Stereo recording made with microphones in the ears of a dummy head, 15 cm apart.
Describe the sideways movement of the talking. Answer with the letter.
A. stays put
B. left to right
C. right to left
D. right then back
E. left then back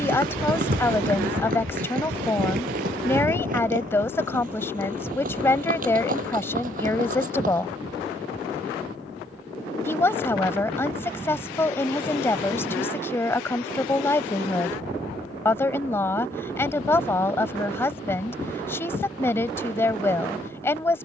A.